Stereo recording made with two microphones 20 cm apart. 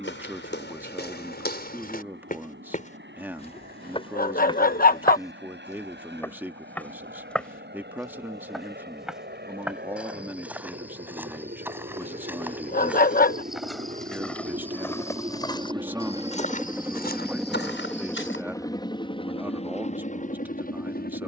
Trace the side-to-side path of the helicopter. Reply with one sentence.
You can hear the helicopter travel towards the left.